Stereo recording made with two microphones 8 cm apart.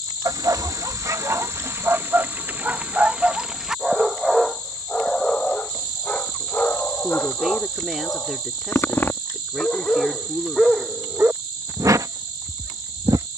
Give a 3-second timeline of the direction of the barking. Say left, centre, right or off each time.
right, centre, left, centre, right.